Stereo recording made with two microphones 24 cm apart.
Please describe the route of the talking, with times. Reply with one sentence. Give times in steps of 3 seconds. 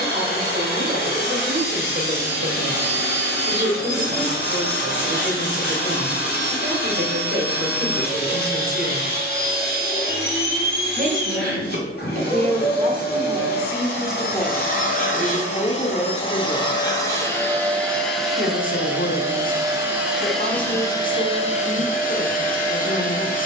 In this clip you hear the talking on the right from 0 s, in the centre from 12 s and on the left from 15 s.